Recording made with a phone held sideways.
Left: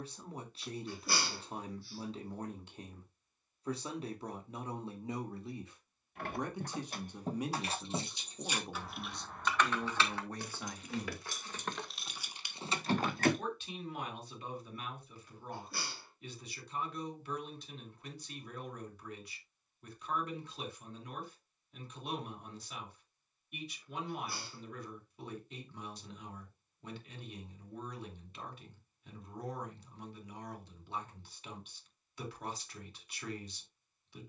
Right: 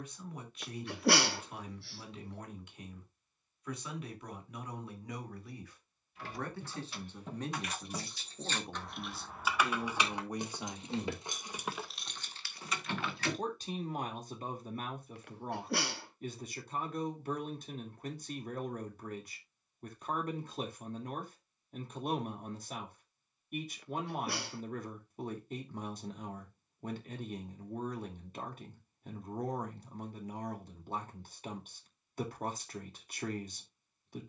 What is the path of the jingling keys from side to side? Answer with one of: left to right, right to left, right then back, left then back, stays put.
right then back.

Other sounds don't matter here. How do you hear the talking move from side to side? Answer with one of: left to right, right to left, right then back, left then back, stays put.
left to right.